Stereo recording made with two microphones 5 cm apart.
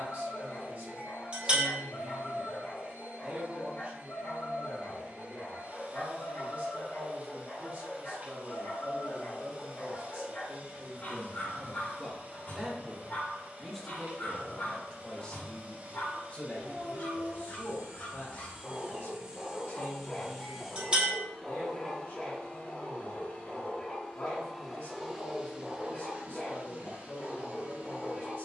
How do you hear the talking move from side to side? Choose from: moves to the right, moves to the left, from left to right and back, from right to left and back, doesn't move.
moves to the left.